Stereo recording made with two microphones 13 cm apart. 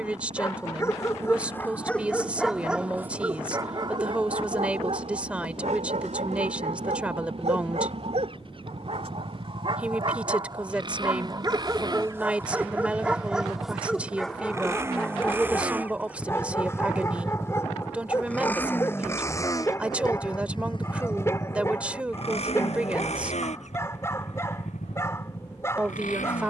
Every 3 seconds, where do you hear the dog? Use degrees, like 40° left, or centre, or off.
10° left, 50° right, 60° right, 40° right, centre, 20° left, 20° left, 20° left, 20° left.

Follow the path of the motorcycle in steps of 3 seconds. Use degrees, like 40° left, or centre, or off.
50° right, 50° right, 50° right, 40° right, 30° right, 10° right, 20° left, 50° left, 70° left.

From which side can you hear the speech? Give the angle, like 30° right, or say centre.
10° right.